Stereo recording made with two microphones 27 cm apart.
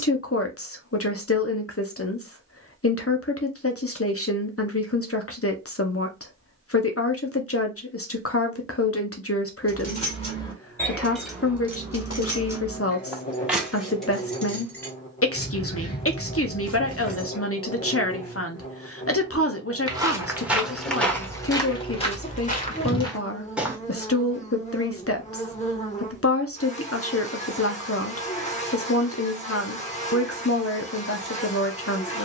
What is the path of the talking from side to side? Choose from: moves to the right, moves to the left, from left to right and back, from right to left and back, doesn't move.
doesn't move.